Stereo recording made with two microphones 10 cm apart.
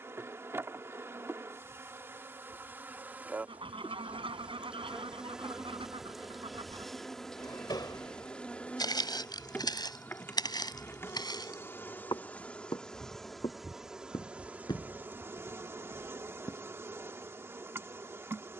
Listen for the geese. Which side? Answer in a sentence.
In this clip you hear the geese on the right.